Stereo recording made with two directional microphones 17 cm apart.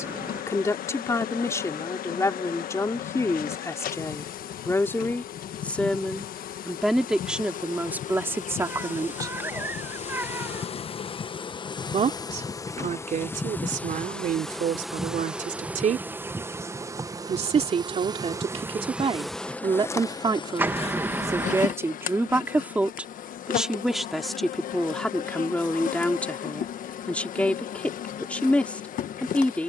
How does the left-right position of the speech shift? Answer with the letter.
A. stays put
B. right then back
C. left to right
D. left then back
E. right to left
B.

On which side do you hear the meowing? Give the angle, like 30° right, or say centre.
10° right.